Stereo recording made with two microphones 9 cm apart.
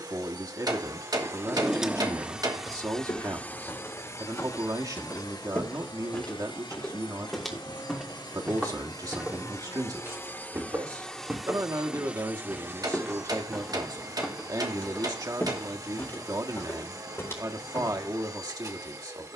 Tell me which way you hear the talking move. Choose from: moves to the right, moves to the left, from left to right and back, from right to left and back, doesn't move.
doesn't move.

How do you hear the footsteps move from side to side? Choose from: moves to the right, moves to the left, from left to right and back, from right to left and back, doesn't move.
from left to right and back.